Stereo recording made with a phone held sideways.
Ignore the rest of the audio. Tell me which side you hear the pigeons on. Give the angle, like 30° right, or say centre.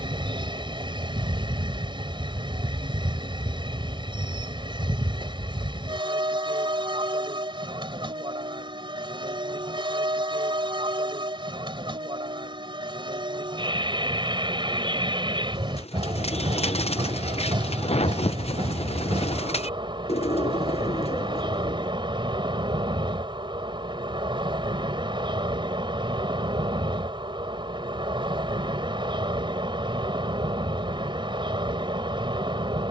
50° left.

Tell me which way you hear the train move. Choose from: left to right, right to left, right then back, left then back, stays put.
stays put.